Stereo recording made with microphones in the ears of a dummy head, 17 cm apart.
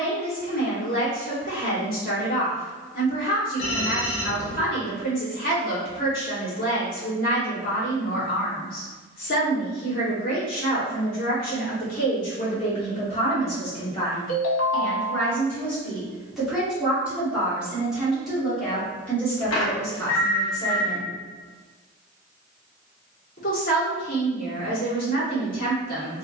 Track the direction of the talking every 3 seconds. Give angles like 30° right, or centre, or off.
50° left, 50° left, 50° left, 50° left, 30° left, centre, 10° left, 50° left, 50° left.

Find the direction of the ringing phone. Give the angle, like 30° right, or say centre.
80° left.